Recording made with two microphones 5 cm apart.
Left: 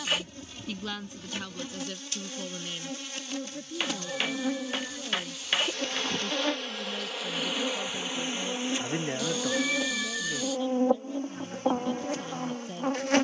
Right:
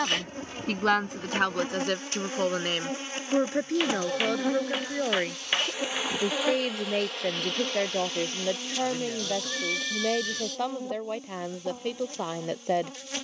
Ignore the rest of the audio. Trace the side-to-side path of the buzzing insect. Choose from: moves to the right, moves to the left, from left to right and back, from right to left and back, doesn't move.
moves to the left.